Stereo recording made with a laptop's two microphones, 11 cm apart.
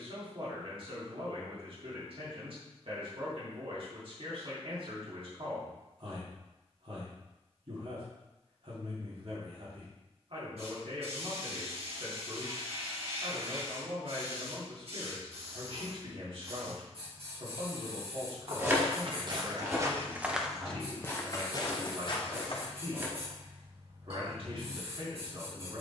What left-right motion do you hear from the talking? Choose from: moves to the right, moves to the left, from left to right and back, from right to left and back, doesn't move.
doesn't move.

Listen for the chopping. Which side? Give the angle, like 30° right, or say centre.
20° right.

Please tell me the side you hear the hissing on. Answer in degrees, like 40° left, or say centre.
70° right.